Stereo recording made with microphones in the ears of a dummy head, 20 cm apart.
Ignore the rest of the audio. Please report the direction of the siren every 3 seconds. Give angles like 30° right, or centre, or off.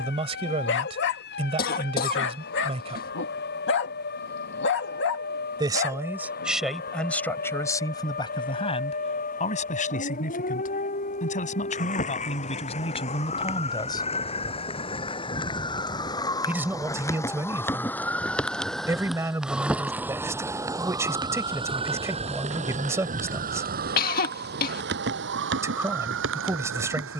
50° left, 50° left, 40° left, 40° left, 30° left, 20° left, centre, 30° right, 60° right.